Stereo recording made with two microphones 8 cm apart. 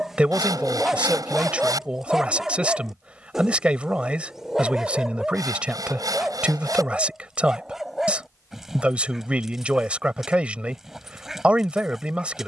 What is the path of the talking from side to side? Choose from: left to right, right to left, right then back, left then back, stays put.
stays put.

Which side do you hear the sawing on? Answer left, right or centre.
right.